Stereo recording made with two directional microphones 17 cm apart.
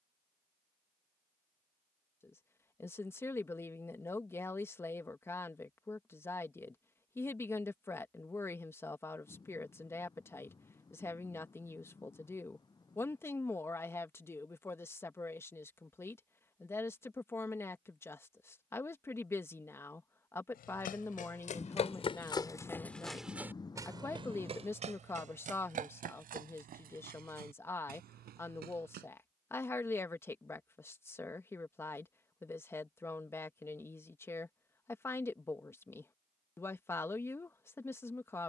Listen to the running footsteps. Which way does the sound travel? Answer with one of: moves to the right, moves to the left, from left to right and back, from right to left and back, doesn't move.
moves to the right.